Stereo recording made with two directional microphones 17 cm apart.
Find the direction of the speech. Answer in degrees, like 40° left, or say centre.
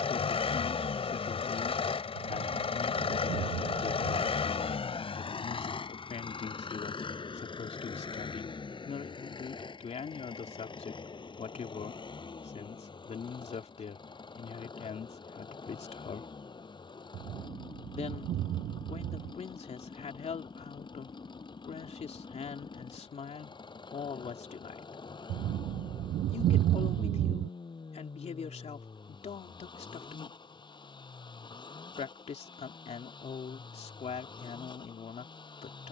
40° left.